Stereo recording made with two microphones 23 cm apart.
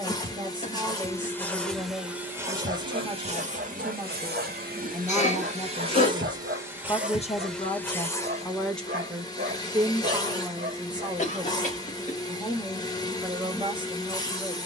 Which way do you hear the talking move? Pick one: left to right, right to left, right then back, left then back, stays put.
left then back.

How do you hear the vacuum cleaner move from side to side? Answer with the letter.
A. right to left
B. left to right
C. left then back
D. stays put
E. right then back
E.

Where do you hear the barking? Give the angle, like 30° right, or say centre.
40° right.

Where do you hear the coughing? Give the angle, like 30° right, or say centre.
30° left.